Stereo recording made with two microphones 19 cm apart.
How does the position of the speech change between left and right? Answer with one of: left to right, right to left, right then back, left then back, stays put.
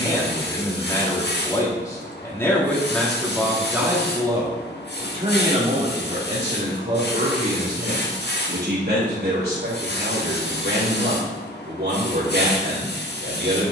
left to right.